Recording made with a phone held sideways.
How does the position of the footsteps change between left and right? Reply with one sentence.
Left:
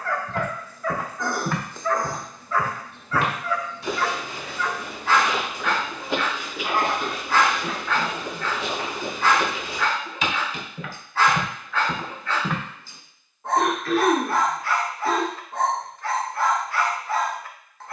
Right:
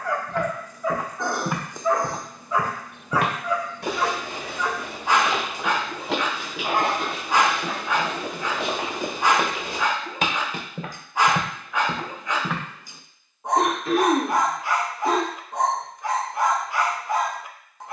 You can hear the footsteps go right and come back.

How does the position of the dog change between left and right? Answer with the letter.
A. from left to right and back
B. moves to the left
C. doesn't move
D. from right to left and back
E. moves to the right
C.